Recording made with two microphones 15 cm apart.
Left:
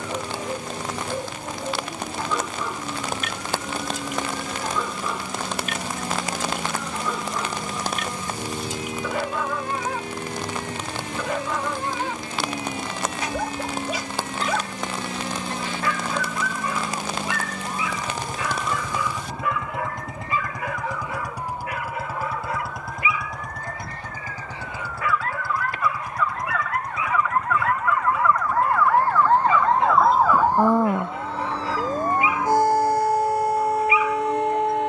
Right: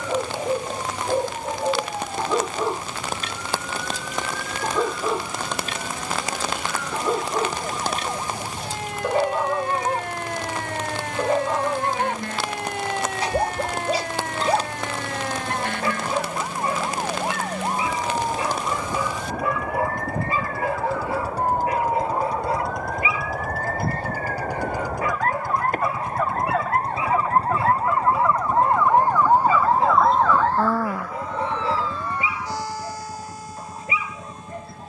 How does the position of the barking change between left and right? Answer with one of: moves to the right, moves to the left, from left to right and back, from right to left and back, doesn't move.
doesn't move.